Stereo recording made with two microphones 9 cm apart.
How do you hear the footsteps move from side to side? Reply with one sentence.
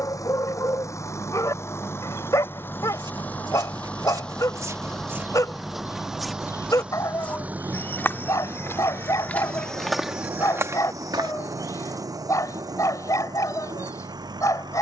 You can hear the footsteps move from right to left and back again.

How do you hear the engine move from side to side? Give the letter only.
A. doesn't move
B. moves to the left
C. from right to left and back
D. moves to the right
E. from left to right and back
D.